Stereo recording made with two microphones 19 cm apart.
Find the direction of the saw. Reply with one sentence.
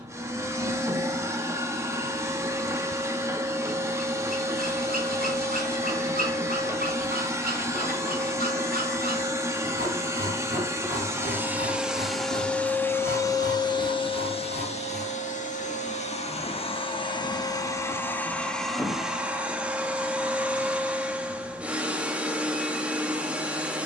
You can hear the saw on the right.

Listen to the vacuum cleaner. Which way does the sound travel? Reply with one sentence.
In this clip you hear the vacuum cleaner go left and come back.